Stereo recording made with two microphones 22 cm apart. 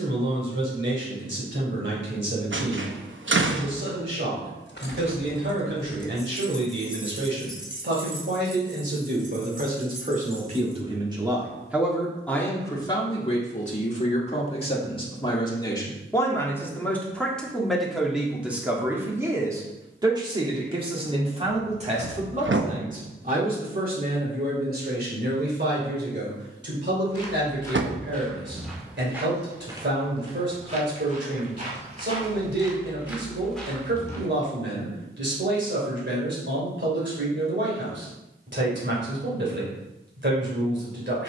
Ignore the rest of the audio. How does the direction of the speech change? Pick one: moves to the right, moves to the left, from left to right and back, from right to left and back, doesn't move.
from right to left and back.